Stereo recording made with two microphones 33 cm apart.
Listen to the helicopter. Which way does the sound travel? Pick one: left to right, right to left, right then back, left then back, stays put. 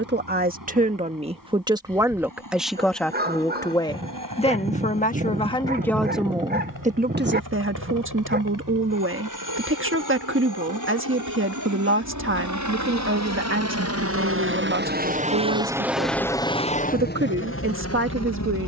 right to left.